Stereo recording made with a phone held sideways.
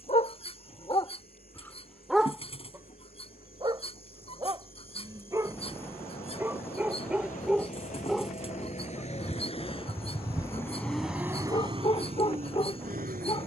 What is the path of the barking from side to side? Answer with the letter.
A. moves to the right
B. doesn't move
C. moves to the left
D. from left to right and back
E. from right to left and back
D.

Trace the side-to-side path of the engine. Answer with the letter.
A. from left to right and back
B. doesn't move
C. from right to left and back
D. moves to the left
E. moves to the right
E.